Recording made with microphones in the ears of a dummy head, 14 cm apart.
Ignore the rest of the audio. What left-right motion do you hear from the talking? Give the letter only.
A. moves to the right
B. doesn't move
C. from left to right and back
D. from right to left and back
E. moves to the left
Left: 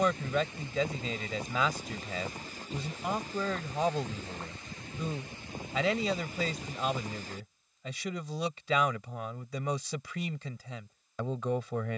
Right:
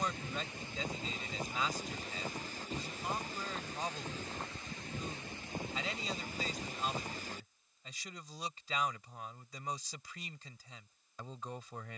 B.